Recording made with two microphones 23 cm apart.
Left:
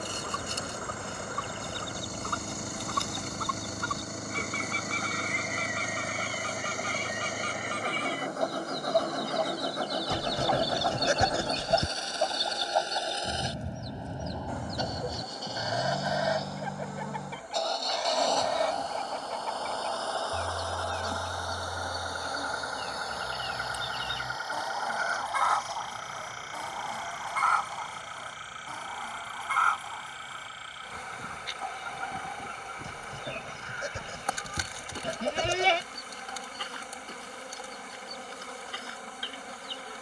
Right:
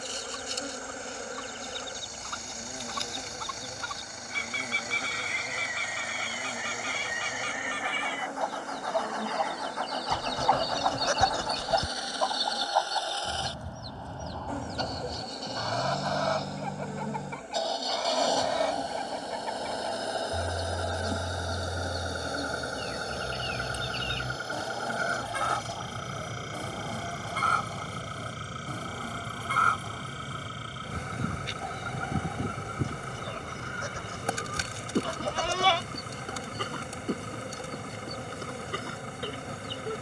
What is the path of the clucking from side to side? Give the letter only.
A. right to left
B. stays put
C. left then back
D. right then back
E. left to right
E.